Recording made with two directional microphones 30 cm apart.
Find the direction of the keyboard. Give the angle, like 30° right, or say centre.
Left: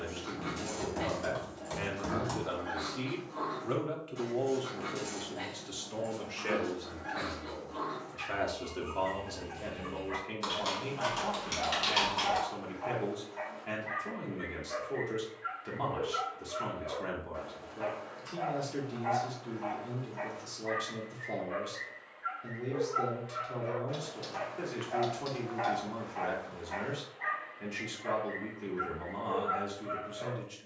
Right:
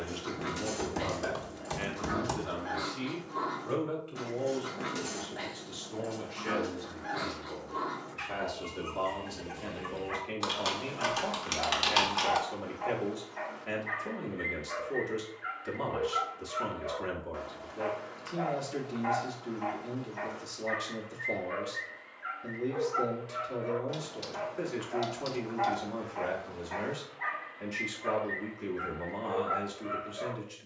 40° right.